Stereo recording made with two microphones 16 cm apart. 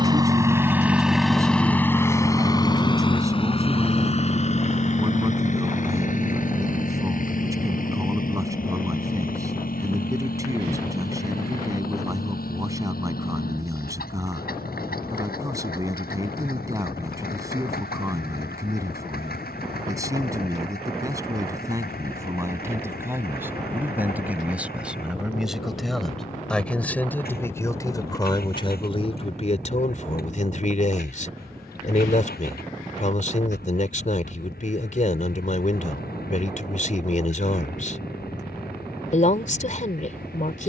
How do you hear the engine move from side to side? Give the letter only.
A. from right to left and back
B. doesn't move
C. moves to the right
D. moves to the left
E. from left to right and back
D.